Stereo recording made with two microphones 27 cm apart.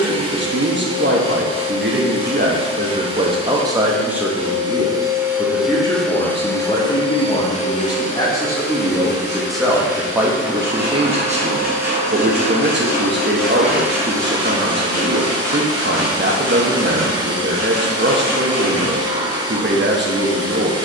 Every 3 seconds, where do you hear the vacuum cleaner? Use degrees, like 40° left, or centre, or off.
20° right, 10° right, 20° left, 40° left, centre, 20° right, 20° right.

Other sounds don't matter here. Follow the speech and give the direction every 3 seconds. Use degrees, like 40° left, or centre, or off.
40° right, centre, 20° left, 10° right, 40° right, 40° right, 40° right.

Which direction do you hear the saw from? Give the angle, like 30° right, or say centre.
10° right.